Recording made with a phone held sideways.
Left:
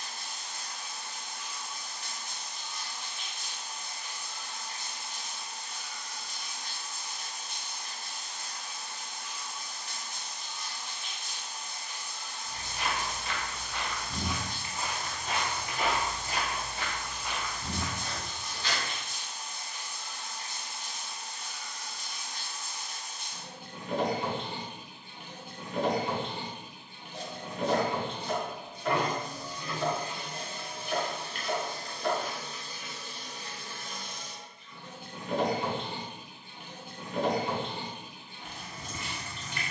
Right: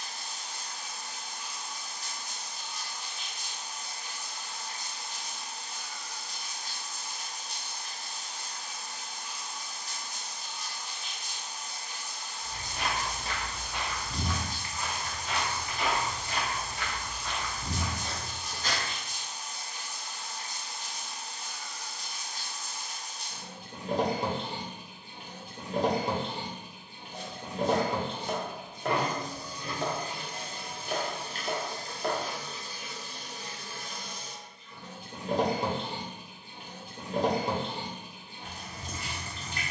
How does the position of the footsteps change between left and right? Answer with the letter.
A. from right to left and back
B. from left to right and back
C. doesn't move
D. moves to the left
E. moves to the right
A.